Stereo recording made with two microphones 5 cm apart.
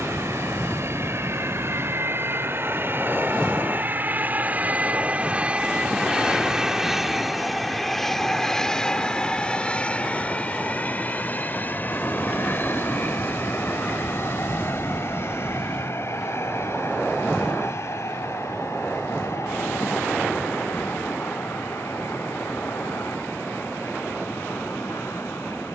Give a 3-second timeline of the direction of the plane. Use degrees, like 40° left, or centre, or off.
50° right, 30° right, centre, 30° left, 40° left, 50° left, 60° left, 60° left, 60° left.